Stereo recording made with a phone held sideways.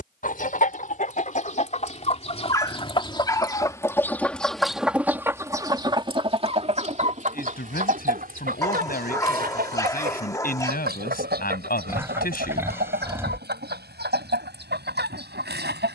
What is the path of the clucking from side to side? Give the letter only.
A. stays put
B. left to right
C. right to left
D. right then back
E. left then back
B.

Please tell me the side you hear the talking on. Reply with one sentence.
In this clip you hear the talking on the left.